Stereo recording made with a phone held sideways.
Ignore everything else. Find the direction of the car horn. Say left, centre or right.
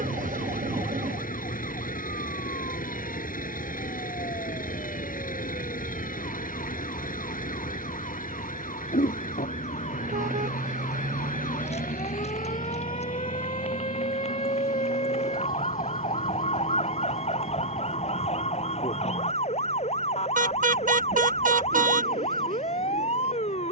right.